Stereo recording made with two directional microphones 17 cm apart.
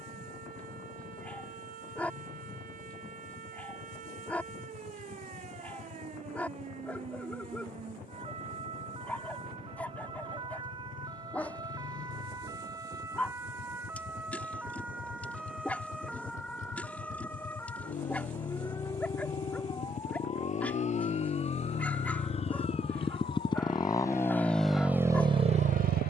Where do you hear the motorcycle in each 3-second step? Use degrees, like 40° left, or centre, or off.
50° left, 50° left, 50° left, 50° left, 50° left, 50° left, 50° left, 30° left, 20° right.